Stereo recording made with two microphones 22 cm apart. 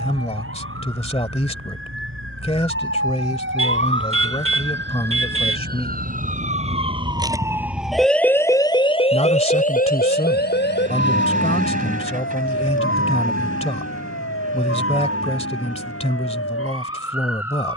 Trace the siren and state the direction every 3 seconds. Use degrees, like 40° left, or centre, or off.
70° right, 60° right, 10° right, 50° left, 70° left, 70° left.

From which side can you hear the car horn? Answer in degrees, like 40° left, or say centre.
70° right.